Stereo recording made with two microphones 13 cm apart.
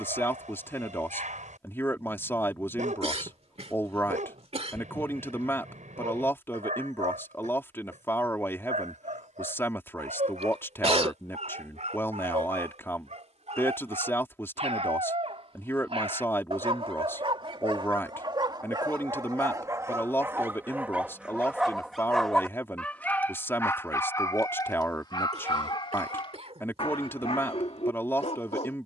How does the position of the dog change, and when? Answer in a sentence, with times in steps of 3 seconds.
In this clip you hear the dog on the right from 0 s, in the centre from 21 s and on the left from 24 s.